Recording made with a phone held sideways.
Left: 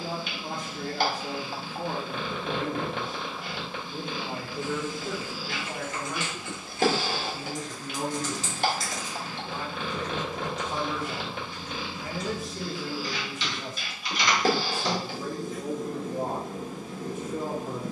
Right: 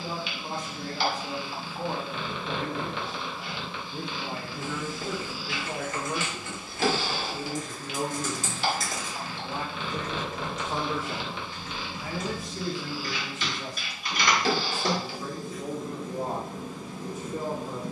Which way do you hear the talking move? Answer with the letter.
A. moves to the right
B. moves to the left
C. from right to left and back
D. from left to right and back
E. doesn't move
D.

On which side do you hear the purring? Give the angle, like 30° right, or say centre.
40° left.